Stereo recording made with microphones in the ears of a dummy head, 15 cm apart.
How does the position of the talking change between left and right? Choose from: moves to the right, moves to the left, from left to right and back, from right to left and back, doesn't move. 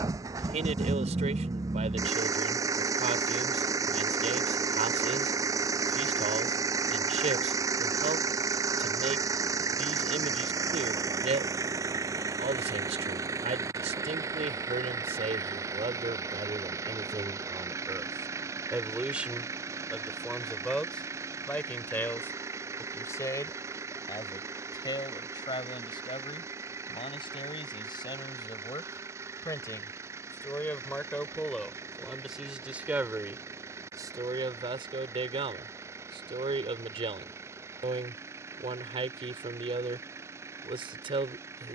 from right to left and back.